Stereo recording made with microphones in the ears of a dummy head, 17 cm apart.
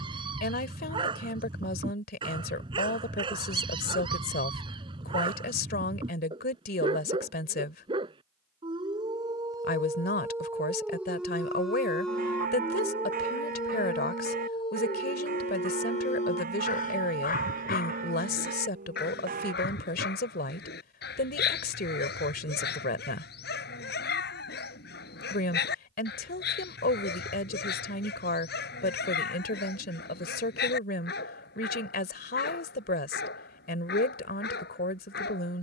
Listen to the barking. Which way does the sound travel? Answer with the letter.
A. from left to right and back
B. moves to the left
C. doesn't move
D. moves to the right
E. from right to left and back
B.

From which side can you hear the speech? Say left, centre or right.
left.